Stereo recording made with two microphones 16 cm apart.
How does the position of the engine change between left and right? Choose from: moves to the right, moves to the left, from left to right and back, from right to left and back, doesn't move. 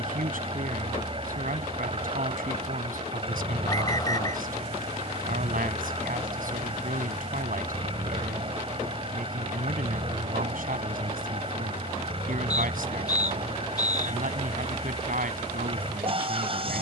doesn't move.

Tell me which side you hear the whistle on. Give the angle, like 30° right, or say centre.
20° left.